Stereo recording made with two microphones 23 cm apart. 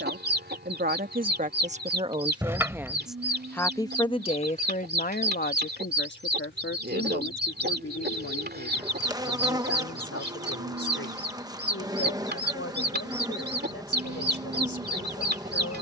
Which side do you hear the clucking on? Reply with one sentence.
You can hear the clucking on the right.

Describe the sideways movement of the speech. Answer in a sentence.
In this clip you hear the speech go from the right side to the left.